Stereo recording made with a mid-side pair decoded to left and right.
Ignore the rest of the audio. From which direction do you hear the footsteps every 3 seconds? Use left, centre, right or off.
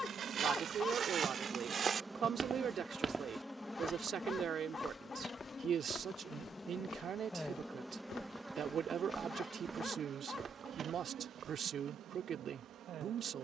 right, centre, left, right, off.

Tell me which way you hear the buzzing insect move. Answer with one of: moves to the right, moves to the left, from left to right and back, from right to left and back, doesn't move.
from right to left and back.